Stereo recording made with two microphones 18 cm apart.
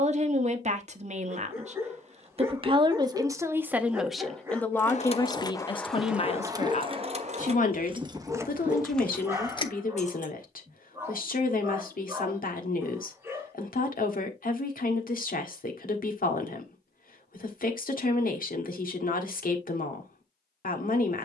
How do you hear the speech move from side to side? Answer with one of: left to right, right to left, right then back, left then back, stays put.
right to left.